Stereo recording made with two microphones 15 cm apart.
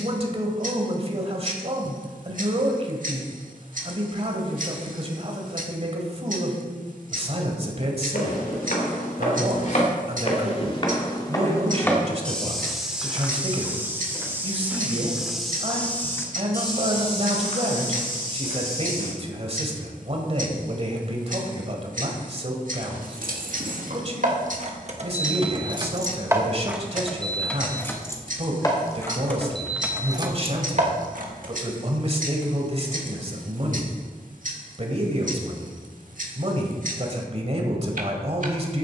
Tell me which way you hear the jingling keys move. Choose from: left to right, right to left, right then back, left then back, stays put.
left then back.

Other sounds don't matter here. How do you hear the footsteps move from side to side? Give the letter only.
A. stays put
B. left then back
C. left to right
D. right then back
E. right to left
D.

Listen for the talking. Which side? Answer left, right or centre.
right.